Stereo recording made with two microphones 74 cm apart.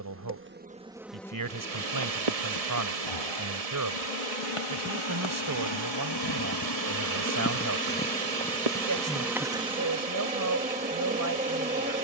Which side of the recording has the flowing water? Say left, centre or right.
right.